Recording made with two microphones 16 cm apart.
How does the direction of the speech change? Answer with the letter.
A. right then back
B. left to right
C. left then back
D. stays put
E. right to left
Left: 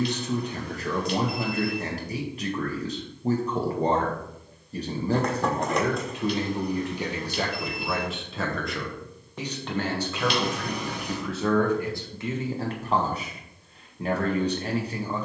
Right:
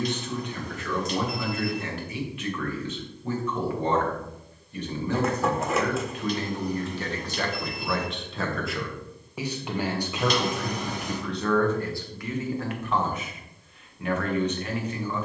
A.